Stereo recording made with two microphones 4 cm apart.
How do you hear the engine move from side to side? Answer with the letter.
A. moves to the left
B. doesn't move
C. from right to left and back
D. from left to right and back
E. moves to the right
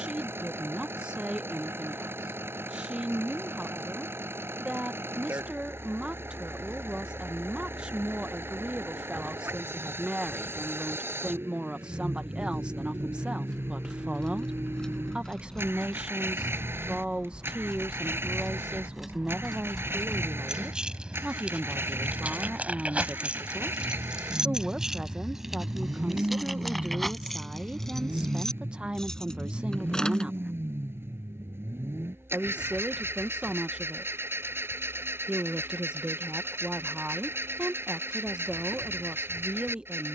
B.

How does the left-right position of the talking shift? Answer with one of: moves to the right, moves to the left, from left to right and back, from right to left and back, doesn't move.
doesn't move.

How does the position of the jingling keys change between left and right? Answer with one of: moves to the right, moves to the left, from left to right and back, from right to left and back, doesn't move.
from left to right and back.